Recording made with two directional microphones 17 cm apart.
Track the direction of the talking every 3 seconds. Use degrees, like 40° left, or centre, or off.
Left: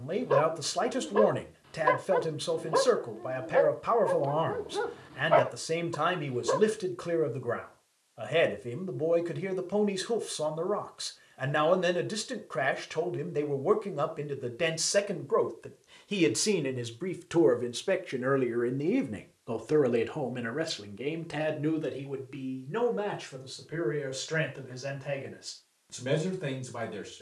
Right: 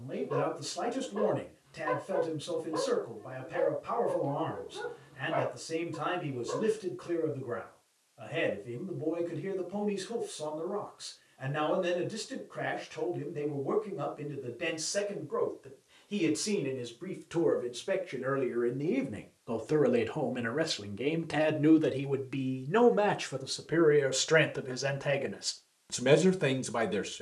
60° left, 60° left, 60° left, 60° left, 60° left, 40° left, 10° left, 30° right, 40° right.